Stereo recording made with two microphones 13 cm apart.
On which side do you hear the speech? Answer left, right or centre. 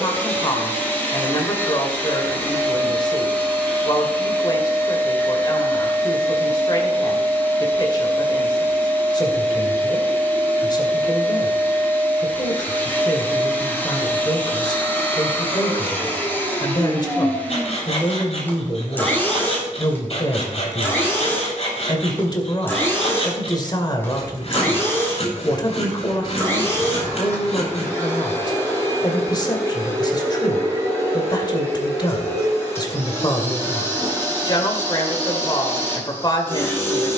left.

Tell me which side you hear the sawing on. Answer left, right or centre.
left.